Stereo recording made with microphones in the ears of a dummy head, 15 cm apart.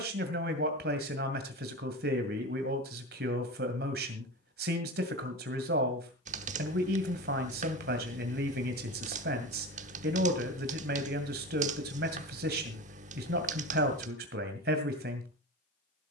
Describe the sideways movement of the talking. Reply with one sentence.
You can hear the talking stay put.